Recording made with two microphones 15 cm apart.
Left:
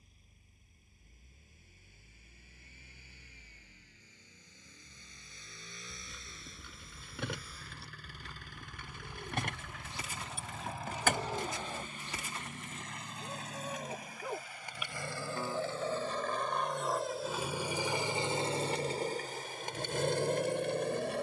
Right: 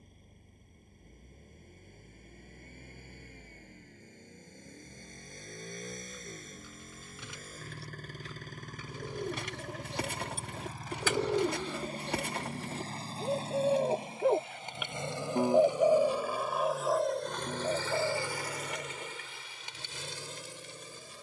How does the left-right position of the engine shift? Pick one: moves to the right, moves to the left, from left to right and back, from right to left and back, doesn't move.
moves to the left.